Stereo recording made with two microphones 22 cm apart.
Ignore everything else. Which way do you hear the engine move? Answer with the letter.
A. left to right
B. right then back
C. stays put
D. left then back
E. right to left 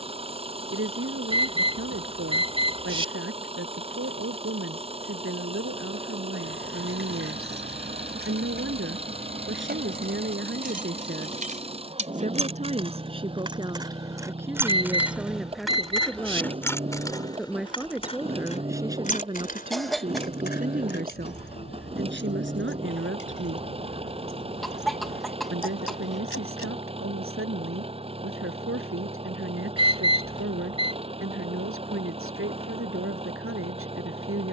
C.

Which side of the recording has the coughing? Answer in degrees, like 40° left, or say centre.
centre.